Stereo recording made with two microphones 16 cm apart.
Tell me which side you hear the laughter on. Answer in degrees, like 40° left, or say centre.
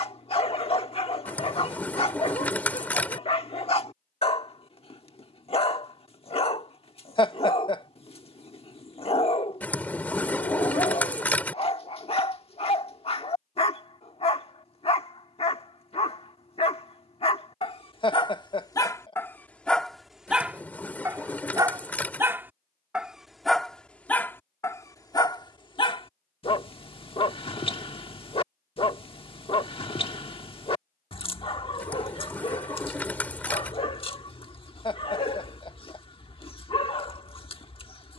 30° left.